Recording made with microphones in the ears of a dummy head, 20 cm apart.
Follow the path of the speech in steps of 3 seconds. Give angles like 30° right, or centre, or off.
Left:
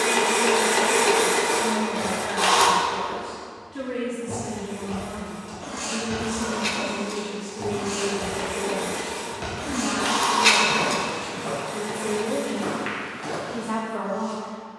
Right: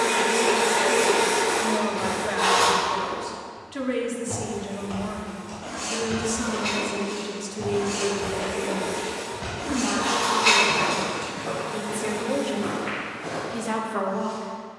80° right, 80° right, 40° right, 20° right, 60° right.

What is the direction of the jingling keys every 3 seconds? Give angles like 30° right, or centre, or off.
off, 30° left, 20° left, centre, off.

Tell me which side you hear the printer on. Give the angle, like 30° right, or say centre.
30° left.